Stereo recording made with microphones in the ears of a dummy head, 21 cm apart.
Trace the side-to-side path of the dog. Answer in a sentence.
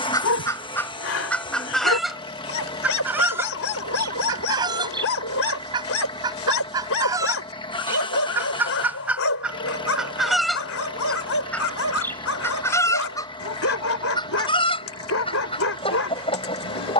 You can hear the dog stay put.